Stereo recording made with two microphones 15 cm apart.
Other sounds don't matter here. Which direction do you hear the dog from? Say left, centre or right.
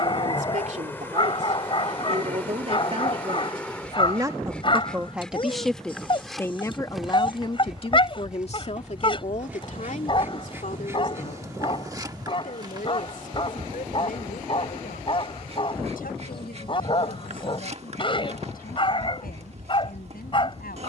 left.